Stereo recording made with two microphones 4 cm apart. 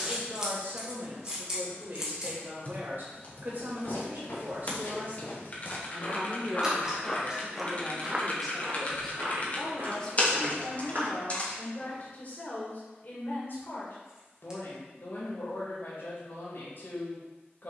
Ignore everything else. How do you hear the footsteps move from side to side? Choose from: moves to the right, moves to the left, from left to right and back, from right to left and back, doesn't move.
moves to the right.